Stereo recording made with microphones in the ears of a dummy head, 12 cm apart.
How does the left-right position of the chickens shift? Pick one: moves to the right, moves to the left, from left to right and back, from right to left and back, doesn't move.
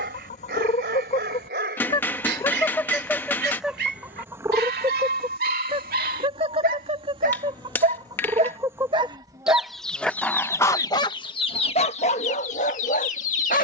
from left to right and back.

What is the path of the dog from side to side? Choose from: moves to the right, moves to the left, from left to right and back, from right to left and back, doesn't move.
moves to the left.